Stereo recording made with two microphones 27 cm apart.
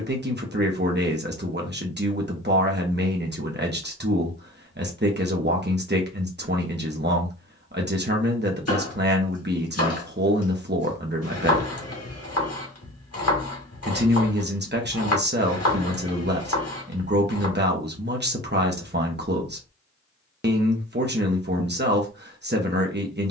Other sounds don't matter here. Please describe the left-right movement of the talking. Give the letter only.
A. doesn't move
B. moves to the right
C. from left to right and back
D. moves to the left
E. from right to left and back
A.